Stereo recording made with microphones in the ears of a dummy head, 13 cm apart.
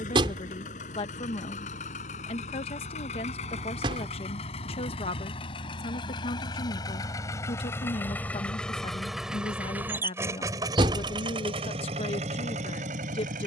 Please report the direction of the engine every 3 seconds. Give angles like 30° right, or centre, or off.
50° left, 40° left, 20° left, 20° right, 50° right.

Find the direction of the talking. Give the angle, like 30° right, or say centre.
40° left.